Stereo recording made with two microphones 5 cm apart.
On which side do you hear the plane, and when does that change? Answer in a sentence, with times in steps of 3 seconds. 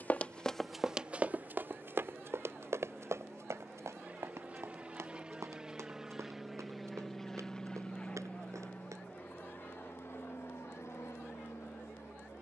In this clip you hear the plane on the right from 0 s, in the centre from 6 s and on the left from 9 s.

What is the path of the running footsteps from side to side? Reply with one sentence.
You can hear the running footsteps move from left to right.